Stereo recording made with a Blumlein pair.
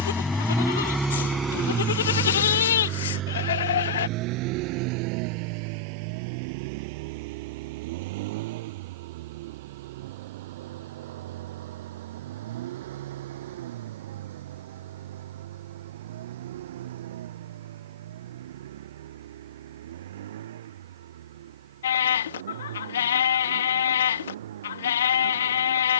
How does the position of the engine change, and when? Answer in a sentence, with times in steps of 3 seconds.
You can hear the engine in the centre from 0 s and on the right from 3 s.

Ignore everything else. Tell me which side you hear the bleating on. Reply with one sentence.
In this clip you hear the bleating on the left.